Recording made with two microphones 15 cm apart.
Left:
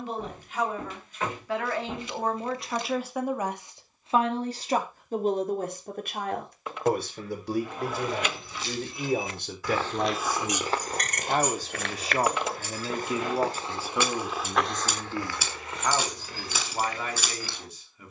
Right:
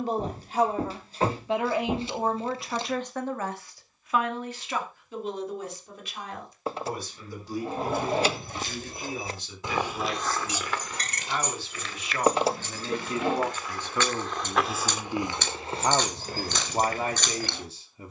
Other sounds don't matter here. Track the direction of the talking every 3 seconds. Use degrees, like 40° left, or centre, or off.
20° right, 30° left, 60° left, 50° left, 10° left, 30° right.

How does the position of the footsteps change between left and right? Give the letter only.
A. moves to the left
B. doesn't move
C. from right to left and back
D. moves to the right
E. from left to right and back
C.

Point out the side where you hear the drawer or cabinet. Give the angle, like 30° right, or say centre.
30° right.